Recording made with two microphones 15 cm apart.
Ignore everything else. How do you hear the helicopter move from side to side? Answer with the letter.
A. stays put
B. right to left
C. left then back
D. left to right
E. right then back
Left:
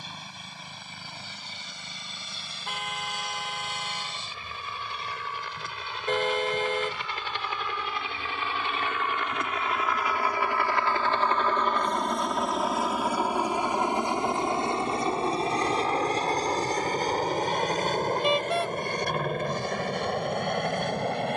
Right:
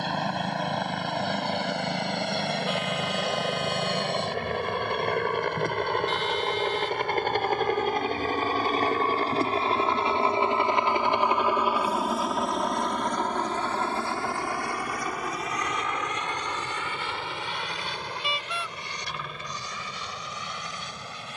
B.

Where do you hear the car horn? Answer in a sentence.
In this clip you hear the car horn on the left.